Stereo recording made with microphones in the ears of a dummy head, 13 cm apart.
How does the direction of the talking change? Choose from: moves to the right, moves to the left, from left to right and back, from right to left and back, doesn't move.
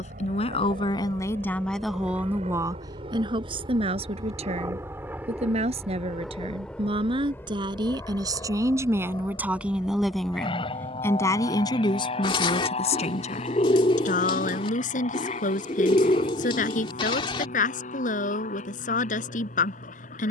from left to right and back.